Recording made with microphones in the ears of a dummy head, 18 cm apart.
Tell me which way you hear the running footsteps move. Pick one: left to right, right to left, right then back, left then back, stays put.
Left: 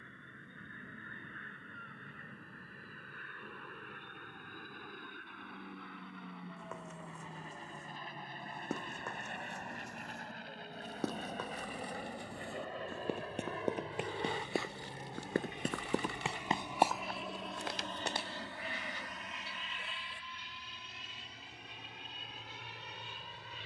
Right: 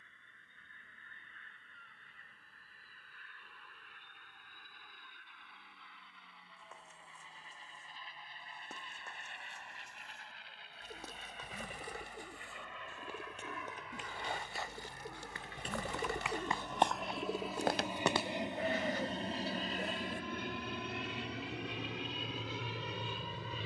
left to right.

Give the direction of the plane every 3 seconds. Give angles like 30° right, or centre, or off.
60° left, 50° left, 50° left, 40° left, 30° left, 10° left, 30° right, 60° right.